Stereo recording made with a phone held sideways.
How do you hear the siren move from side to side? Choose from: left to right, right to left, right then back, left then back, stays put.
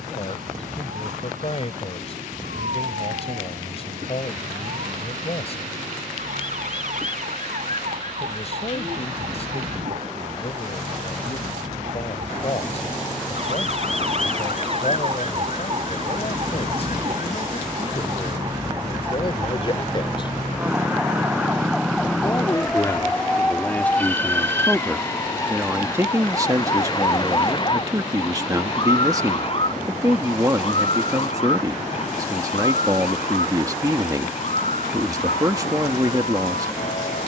right to left.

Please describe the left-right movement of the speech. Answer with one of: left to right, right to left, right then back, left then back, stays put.
left to right.